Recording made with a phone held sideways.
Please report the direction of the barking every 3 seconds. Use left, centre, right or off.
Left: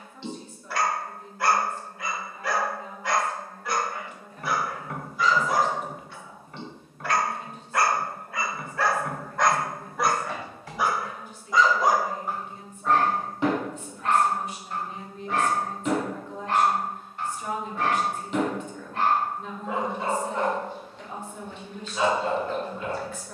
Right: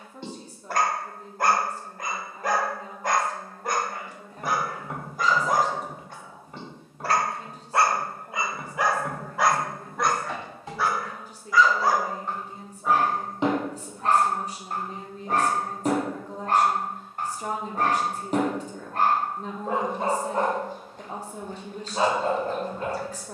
right, right, right, centre, right, right, right, right.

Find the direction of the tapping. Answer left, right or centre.
right.